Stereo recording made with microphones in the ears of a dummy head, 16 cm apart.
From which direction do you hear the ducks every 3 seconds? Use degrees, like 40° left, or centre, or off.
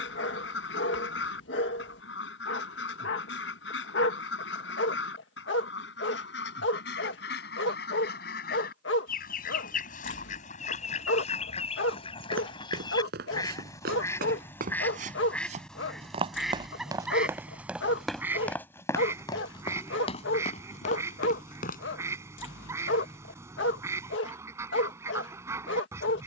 70° left, 70° left, 60° left, 40° left, 20° left, centre, 10° right, 20° right, 20° right.